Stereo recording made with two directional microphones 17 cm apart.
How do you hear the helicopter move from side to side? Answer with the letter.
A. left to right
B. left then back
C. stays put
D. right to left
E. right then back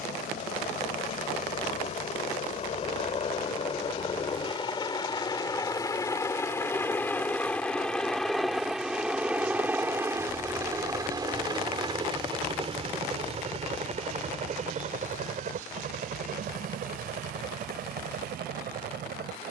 A.